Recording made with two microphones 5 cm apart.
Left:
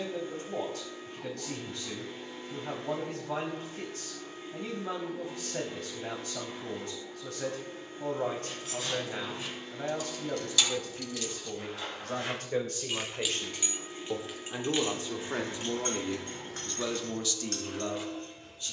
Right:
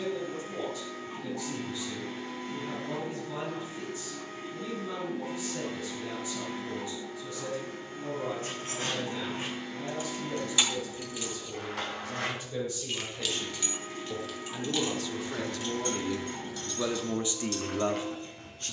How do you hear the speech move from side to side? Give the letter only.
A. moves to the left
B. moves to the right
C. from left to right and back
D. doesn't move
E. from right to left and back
B.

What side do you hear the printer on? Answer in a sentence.
You can hear the printer on the right.